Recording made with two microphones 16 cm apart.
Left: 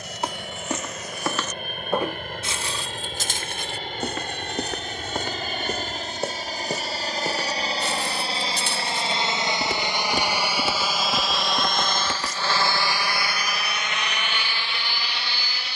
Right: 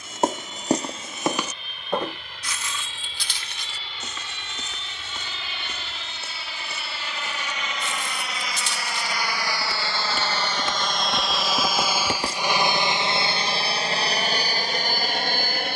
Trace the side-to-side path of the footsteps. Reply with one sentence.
In this clip you hear the footsteps move from right to left and back again.